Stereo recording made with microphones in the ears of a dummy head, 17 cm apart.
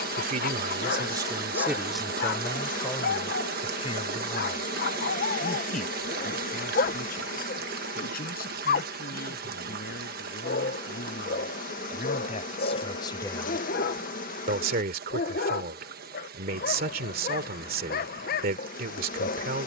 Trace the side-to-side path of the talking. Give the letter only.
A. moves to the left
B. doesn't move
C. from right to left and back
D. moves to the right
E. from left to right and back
C.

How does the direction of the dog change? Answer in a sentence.
In this clip you hear the dog stay in one place.